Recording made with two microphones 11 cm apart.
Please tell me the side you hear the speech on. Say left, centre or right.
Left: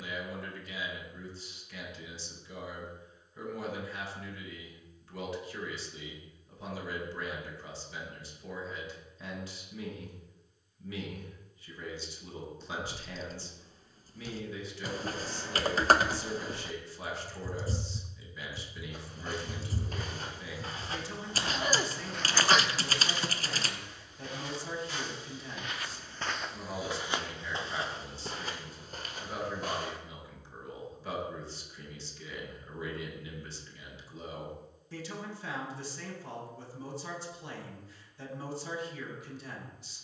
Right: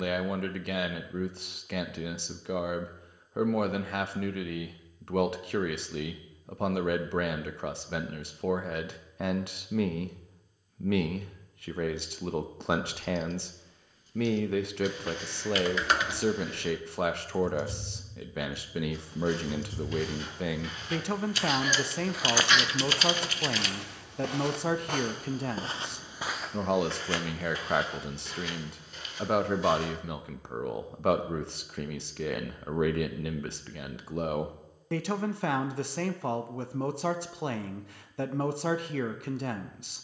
right.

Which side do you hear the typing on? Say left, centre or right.
left.